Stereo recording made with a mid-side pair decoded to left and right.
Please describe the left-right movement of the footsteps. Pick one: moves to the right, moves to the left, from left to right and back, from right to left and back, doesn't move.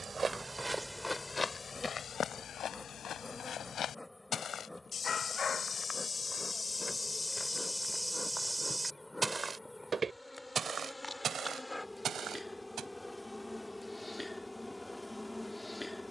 from right to left and back.